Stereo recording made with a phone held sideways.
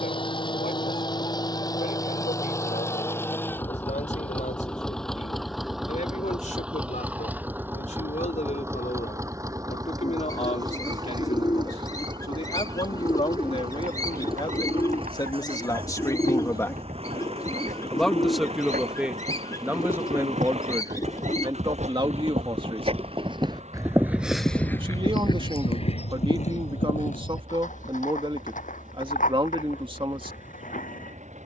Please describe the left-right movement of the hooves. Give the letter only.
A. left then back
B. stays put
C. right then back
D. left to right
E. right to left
E.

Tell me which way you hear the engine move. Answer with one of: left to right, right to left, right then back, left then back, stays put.
left to right.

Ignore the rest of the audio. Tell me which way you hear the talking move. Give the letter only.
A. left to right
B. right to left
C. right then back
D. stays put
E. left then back
A.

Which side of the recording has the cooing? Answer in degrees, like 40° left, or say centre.
30° left.